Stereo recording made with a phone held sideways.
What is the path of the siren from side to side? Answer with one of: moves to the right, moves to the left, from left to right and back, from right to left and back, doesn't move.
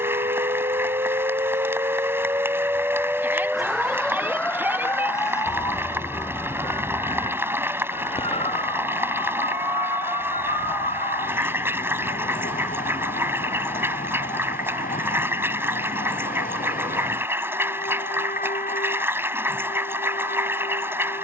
moves to the left.